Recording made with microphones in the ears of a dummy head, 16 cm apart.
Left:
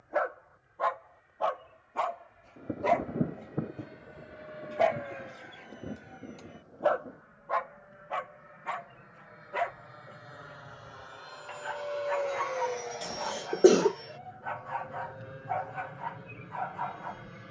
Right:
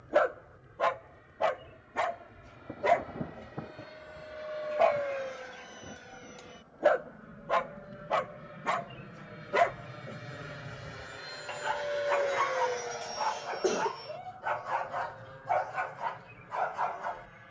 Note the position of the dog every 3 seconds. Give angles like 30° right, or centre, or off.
20° right, 10° left, 40° right, 50° right, 50° right, 50° right.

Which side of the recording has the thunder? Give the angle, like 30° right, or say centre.
40° left.